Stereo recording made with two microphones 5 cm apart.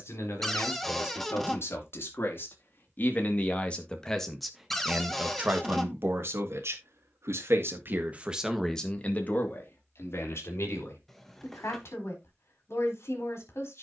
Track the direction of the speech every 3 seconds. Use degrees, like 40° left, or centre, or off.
50° left, 10° right, 40° right, 50° left, 60° left.